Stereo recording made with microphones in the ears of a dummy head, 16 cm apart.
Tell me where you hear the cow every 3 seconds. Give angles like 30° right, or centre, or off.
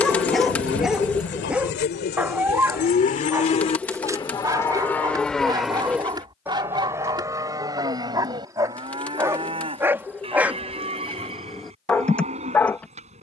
60° left, 20° left, 20° right, 30° right, 40° right.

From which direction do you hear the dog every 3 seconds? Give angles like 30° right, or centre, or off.
10° right, 20° right, 20° right, 10° right, 10° left.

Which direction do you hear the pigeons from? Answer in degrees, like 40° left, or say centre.
10° left.